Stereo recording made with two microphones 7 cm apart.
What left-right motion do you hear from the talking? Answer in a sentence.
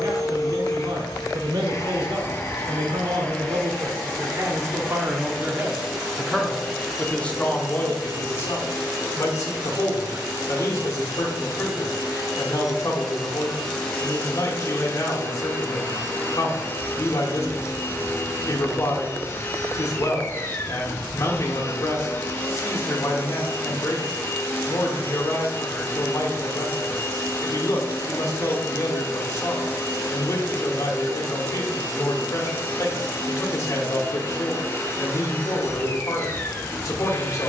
In this clip you hear the talking travel towards the left.